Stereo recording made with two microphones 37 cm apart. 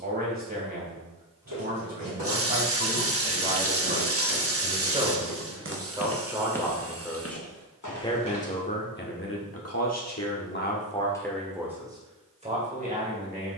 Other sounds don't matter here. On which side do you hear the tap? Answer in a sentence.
In this clip you hear the tap on the right.